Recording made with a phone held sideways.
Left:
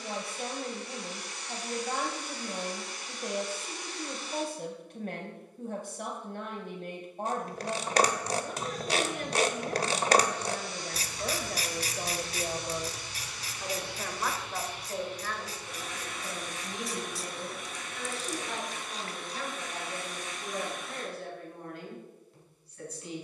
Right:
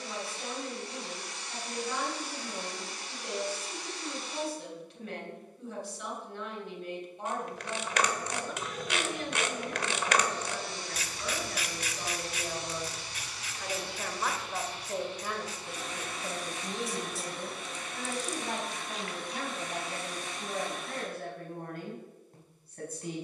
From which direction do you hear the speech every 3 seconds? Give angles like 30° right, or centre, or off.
50° left, 50° left, 50° left, 50° left, 10° left, 30° right, 50° right, 50° right.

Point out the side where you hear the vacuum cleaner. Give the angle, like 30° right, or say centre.
30° right.